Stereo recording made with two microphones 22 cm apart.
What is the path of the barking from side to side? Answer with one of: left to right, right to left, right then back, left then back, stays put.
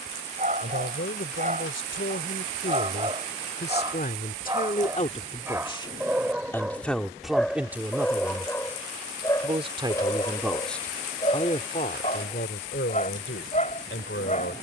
right to left.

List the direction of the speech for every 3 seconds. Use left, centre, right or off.
left, left, centre, centre, left.